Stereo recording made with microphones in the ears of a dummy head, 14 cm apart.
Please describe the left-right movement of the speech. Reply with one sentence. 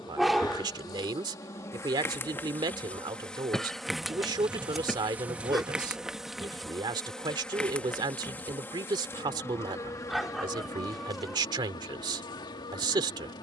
In this clip you hear the speech stay in one place.